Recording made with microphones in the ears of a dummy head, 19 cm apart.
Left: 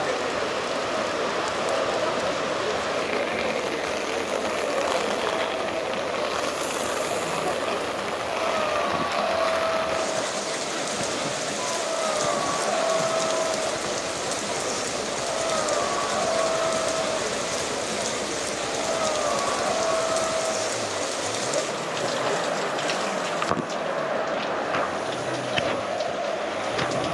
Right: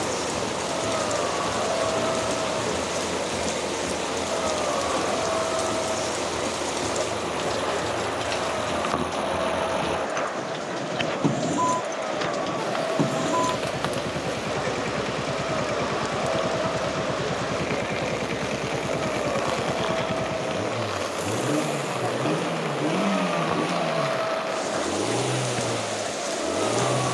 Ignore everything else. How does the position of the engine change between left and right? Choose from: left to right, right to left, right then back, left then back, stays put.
stays put.